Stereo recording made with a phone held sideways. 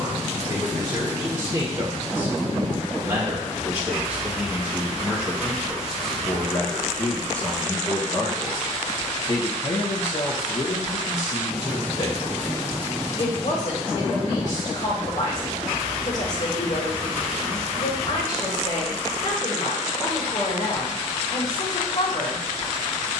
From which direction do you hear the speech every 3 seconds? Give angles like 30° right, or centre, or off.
30° right, 10° right, 20° left, 50° left, 60° left, 60° left, 60° left, 60° left.